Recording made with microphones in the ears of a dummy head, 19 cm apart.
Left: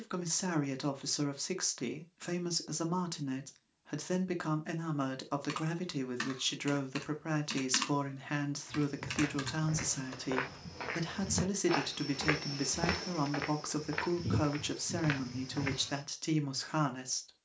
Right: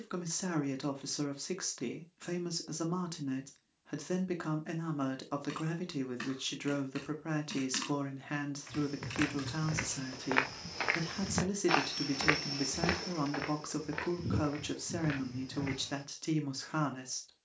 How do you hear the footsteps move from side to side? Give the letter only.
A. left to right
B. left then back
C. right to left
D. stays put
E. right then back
C.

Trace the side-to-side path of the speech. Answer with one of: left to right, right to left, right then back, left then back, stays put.
stays put.